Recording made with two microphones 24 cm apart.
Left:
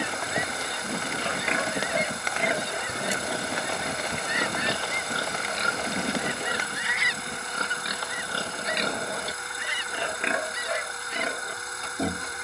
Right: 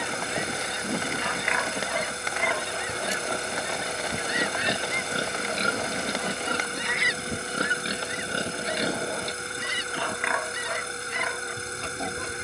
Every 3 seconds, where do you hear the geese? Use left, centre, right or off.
centre, left, centre, right.